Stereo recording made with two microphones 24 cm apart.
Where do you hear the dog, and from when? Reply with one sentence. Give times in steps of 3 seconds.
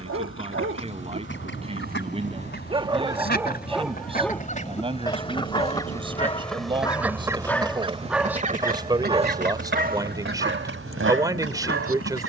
In this clip you hear the dog on the right from 0 s, in the centre from 3 s and on the right from 9 s.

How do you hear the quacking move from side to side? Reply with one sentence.
In this clip you hear the quacking move to the right.